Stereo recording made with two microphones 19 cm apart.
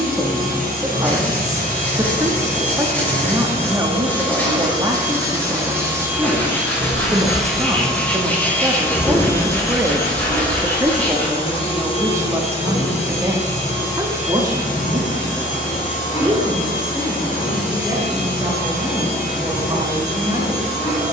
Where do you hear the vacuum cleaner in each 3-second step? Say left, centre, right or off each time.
right, right, centre, left, left, left, left.